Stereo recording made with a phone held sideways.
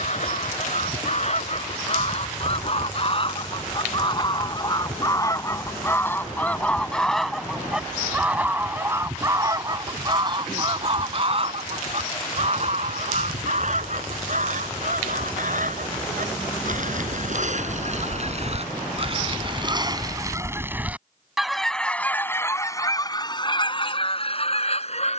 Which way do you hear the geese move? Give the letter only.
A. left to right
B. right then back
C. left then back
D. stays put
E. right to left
B.